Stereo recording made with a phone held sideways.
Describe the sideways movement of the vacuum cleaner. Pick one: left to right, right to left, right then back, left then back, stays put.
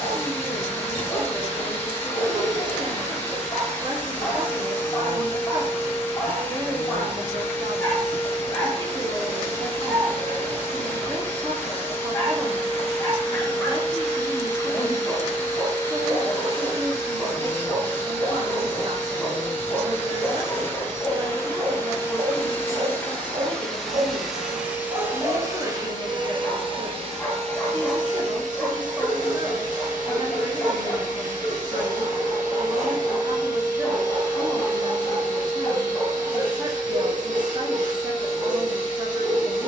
left to right.